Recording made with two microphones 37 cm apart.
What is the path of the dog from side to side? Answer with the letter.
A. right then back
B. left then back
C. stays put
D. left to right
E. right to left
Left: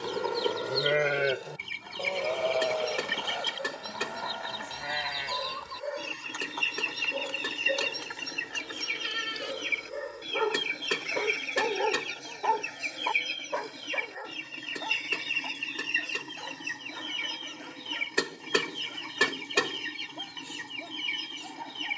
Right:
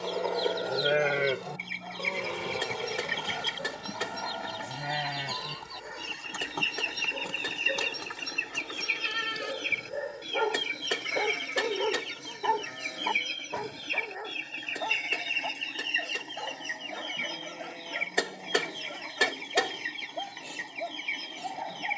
B.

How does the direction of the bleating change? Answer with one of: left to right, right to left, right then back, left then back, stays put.
left to right.